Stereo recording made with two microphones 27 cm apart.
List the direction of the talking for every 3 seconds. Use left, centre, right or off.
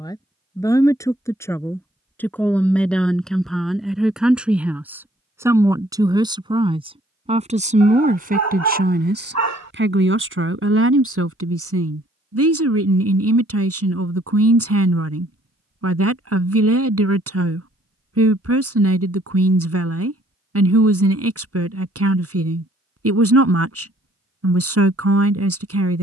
centre, centre, right, right, right, right, right, right, right.